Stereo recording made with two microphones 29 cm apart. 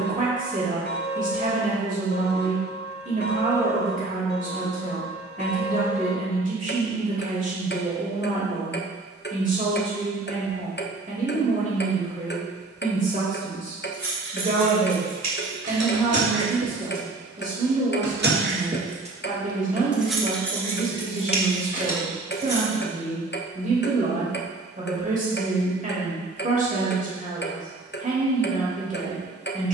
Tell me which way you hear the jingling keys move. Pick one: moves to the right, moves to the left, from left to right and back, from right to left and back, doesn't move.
moves to the left.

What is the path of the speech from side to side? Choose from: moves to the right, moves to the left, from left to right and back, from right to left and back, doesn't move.
doesn't move.